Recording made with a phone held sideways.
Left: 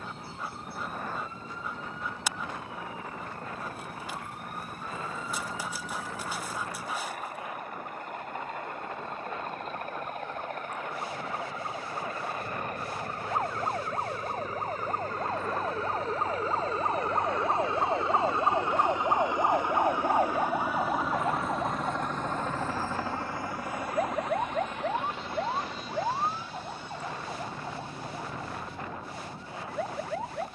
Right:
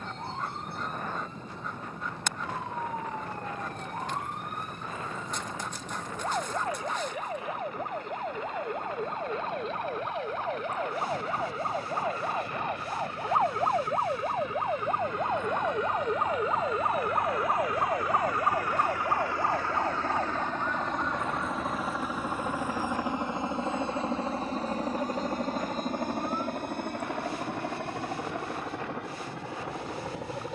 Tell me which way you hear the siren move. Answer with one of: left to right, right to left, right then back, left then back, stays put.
right to left.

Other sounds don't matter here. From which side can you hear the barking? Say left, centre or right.
centre.